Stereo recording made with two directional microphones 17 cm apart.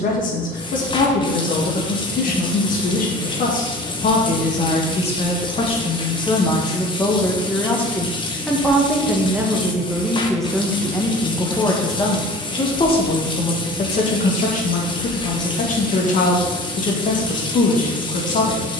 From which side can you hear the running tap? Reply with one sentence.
In this clip you hear the running tap on the left.